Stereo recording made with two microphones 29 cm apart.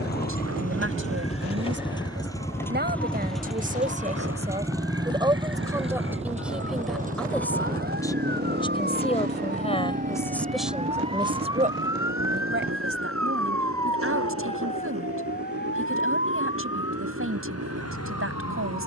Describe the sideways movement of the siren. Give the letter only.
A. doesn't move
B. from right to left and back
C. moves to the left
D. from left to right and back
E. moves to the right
C.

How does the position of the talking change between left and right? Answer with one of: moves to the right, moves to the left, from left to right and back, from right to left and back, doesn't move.
from right to left and back.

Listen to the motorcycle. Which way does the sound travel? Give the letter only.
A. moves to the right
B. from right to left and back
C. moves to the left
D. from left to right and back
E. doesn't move
A.